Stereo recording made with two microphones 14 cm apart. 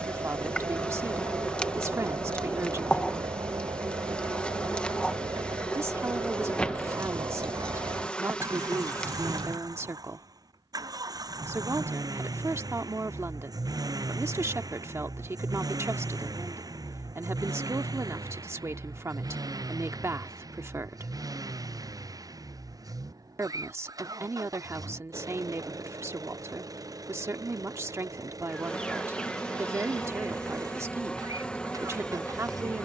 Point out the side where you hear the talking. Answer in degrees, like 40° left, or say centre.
20° right.